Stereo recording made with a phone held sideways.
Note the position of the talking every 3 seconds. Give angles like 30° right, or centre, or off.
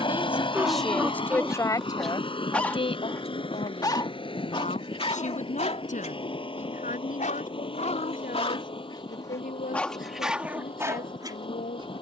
10° left, 50° left, 60° left, 70° left.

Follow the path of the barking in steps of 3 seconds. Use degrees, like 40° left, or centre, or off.
centre, 40° left, 50° left, 10° right.